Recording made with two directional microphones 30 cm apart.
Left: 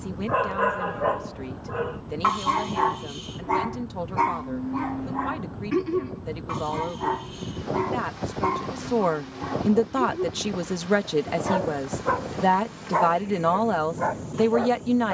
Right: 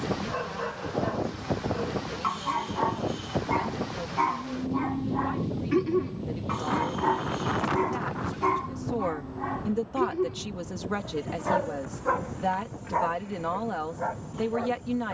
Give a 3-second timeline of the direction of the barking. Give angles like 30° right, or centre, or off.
50° left, 20° left, centre, centre, 40° left.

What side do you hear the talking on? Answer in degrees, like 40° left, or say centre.
60° left.